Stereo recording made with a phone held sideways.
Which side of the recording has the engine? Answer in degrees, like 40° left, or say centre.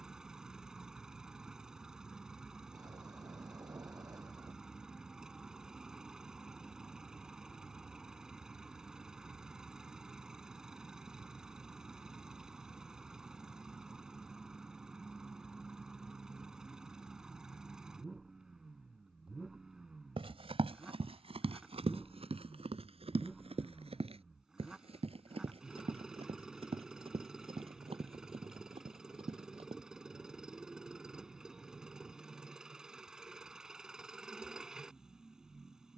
centre.